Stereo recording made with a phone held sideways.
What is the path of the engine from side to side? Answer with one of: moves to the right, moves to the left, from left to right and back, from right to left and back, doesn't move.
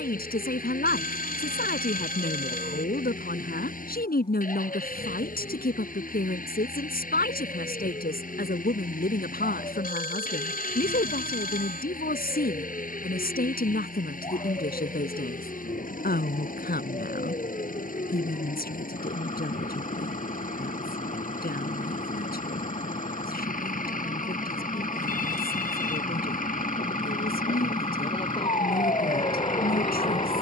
doesn't move.